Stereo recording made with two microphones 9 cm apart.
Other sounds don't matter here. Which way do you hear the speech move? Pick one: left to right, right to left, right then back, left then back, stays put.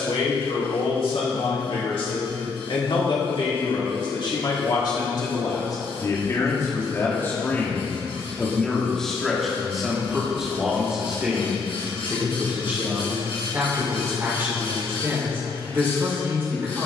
left to right.